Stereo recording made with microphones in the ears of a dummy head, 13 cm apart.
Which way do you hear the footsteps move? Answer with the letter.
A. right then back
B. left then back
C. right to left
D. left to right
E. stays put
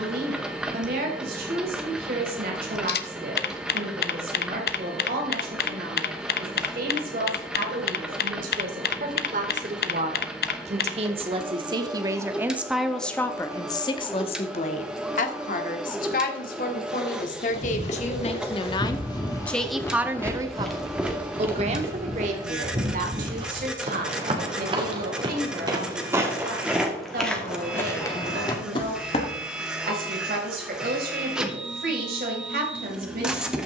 A.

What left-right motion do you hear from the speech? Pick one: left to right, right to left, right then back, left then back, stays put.
left then back.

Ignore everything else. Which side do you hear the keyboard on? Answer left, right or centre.
left.